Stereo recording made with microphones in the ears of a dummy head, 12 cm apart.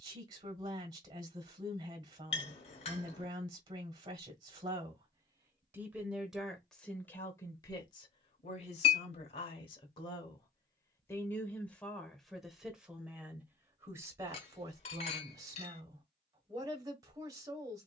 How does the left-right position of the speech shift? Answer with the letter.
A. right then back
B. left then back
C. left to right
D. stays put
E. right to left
B.